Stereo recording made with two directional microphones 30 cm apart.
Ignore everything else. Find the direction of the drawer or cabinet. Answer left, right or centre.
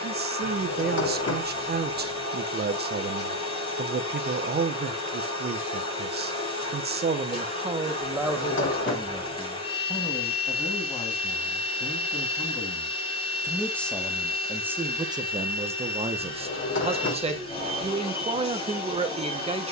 left.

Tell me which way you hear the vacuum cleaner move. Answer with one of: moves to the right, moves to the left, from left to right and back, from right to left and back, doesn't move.
doesn't move.